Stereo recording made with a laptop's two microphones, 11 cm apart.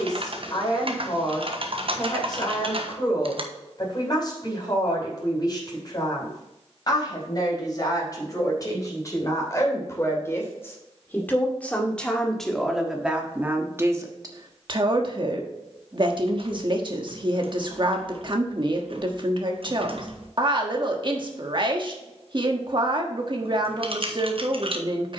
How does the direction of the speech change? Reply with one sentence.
In this clip you hear the speech go from the left side to the right.